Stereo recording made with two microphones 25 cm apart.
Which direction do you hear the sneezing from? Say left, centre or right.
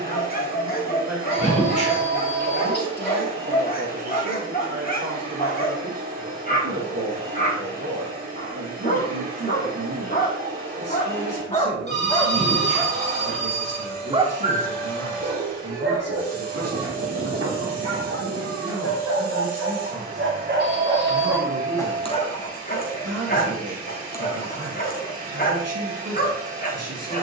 left.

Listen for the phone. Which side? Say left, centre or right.
right.